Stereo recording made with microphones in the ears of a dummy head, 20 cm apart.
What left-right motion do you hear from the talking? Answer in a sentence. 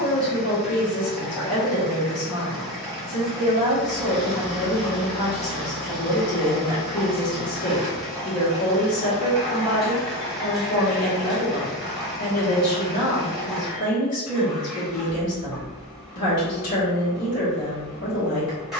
You can hear the talking stay in one place.